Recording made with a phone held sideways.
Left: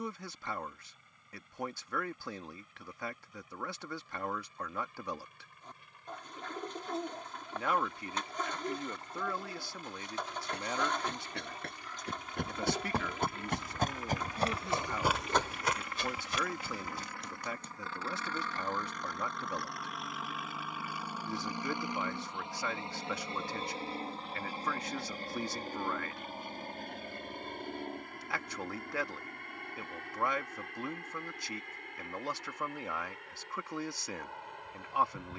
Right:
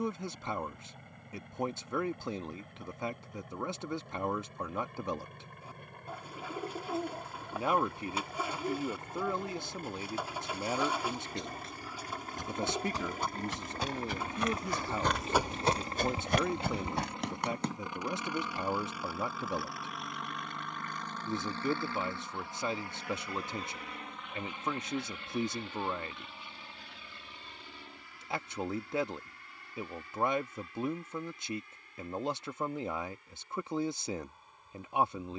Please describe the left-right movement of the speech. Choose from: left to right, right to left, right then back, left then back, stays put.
stays put.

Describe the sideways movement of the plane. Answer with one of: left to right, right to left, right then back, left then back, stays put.
right to left.